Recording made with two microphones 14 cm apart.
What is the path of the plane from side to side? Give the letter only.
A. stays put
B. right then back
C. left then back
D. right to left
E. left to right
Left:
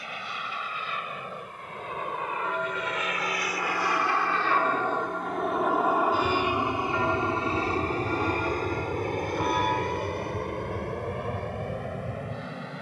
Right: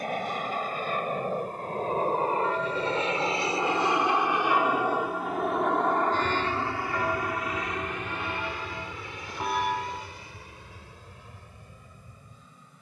D.